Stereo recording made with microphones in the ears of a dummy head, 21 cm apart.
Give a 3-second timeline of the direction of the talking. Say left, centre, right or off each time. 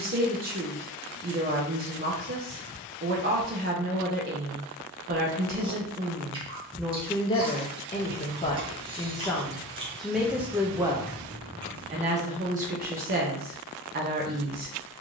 right, right, centre, centre, right.